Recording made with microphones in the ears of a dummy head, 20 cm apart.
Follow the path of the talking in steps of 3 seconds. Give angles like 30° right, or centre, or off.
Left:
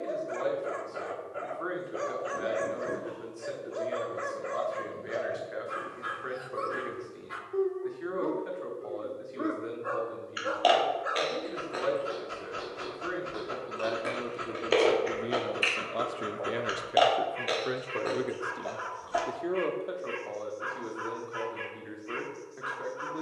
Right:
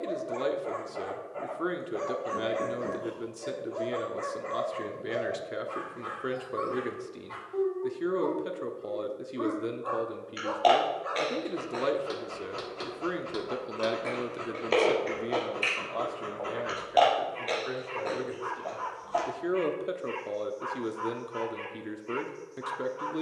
50° right, 50° right, 50° right, 50° right, 30° right, 20° left, 10° right, 40° right.